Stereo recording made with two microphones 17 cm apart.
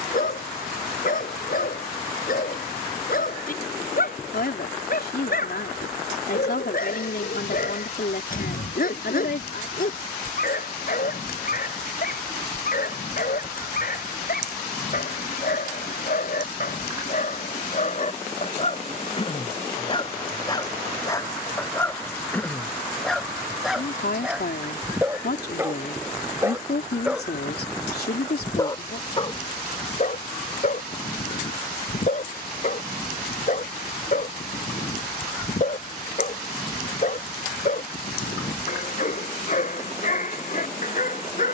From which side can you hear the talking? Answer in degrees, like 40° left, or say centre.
70° left.